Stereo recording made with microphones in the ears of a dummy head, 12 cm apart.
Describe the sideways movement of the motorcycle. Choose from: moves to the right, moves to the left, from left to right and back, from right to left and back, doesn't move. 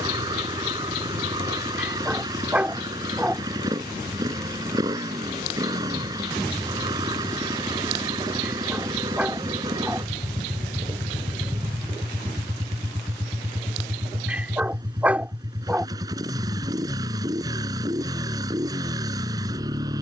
doesn't move.